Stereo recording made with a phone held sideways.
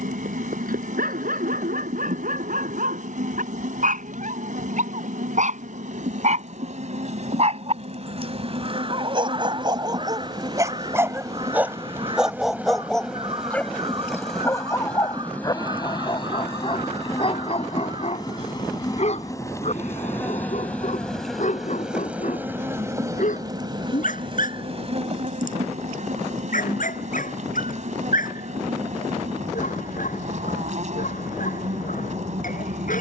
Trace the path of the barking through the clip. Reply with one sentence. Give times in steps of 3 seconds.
You can hear the barking on the right from 0 s, in the centre from 12 s and on the left from 15 s.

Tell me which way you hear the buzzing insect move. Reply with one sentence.
In this clip you hear the buzzing insect go left and come back.